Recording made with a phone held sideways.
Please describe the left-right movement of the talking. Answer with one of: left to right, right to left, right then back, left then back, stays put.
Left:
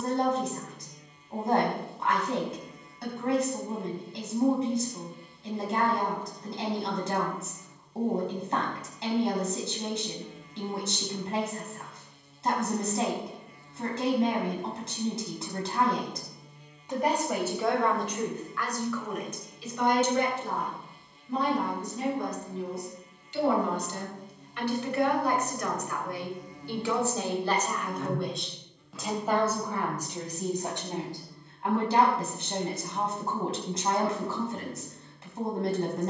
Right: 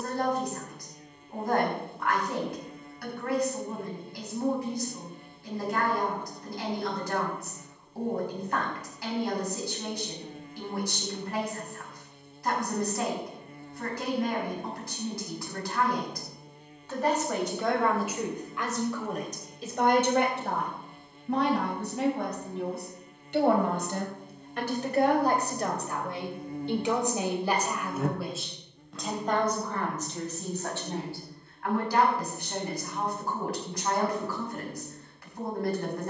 right then back.